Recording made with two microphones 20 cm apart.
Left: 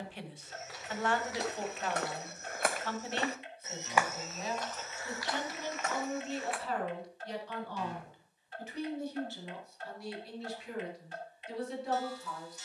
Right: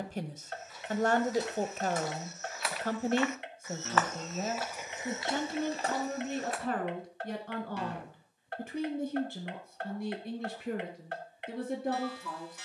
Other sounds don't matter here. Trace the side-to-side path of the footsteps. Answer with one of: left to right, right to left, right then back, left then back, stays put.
left to right.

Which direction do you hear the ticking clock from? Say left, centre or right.
right.